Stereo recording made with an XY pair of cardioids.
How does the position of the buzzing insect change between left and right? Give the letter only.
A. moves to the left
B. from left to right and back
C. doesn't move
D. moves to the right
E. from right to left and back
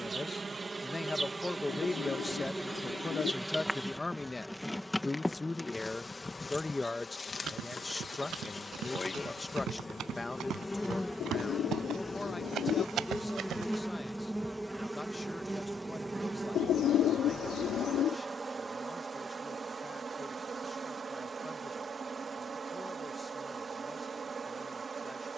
E.